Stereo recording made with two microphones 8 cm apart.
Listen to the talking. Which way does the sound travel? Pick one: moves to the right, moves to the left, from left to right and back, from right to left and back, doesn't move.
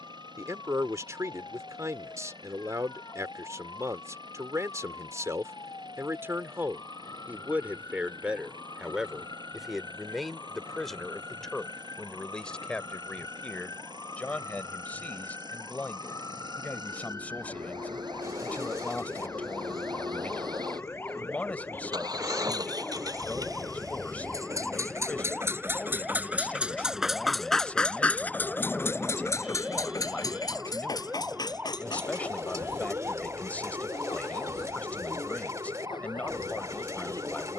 moves to the left.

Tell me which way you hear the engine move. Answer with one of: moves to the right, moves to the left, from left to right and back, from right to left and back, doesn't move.
moves to the left.